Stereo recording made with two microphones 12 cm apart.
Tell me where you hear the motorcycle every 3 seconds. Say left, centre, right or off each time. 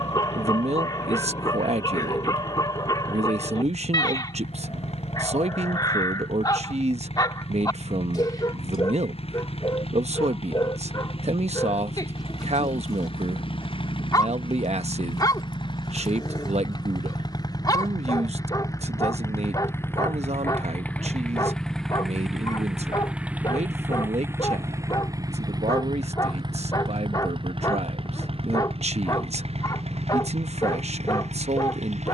left, left, left, left, left, left, left, centre, right, right, right.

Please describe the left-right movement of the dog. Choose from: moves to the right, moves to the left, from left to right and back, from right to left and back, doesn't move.
doesn't move.